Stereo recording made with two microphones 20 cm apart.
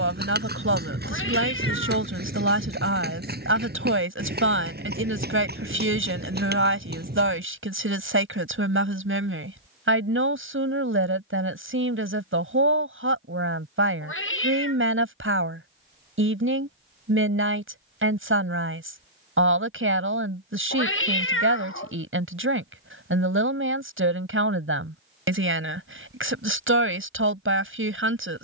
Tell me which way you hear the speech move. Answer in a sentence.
In this clip you hear the speech stay in one place.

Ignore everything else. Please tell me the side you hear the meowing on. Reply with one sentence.
In this clip you hear the meowing on the left.